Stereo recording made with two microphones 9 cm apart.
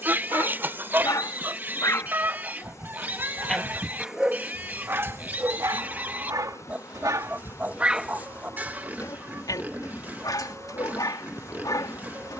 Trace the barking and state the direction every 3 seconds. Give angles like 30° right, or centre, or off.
40° left, 20° right, 30° right, 50° left.